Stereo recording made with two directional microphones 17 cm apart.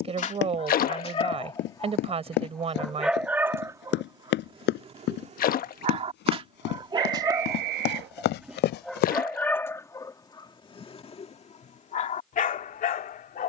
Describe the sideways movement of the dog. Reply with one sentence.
In this clip you hear the dog go right and come back.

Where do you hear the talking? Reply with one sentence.
You can hear the talking on the right.